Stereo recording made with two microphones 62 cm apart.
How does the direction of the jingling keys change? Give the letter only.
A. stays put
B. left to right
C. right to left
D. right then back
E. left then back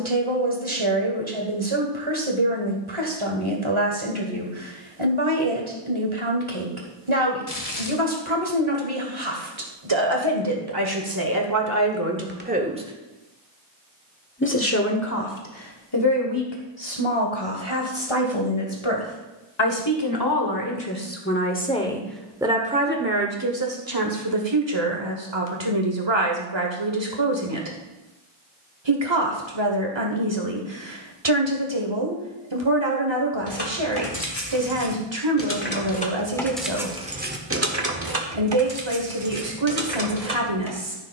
B.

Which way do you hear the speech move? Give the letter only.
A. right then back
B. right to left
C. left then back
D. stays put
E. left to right
C.